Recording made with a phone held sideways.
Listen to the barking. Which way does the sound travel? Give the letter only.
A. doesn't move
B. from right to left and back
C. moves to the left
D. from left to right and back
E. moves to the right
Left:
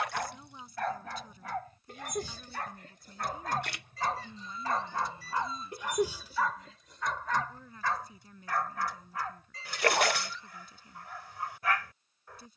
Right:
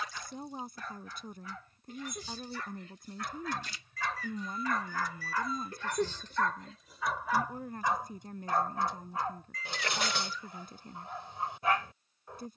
E.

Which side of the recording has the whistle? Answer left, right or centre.
left.